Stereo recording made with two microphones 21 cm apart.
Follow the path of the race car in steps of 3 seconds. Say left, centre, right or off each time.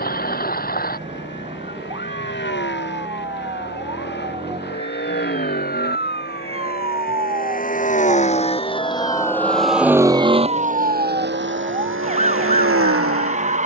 left, left, left, right, right.